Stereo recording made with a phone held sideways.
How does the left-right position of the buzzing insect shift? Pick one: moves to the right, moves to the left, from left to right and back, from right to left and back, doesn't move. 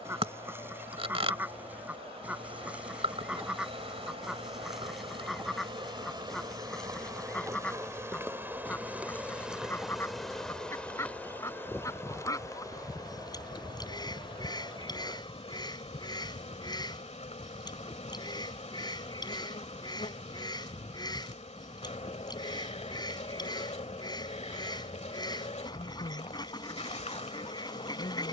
moves to the left.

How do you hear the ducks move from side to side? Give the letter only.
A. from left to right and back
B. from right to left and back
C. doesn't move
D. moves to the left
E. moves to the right
D.